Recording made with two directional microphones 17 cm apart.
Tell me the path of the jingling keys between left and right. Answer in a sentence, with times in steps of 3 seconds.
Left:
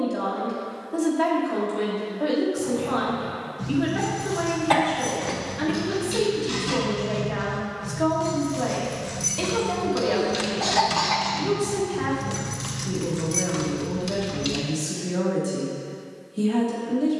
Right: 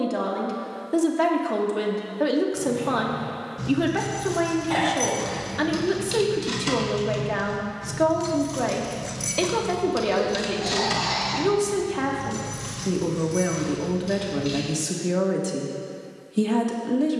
In this clip you hear the jingling keys on the right from 0 s, in the centre from 9 s, on the left from 12 s and not at all from 15 s.